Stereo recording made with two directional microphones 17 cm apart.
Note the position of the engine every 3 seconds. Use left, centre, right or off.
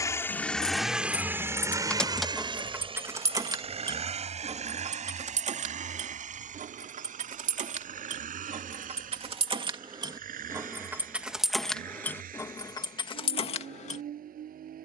centre, right, right, right, right.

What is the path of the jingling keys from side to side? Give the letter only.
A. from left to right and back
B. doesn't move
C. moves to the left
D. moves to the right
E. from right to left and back
A.